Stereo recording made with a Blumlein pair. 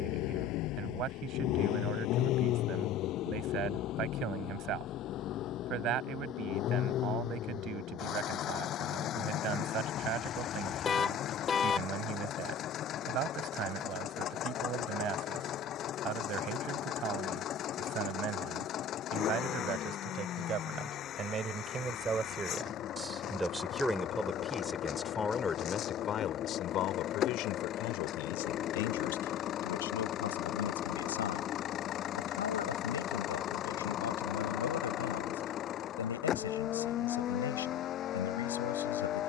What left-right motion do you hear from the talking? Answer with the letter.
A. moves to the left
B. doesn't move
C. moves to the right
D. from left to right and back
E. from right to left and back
A.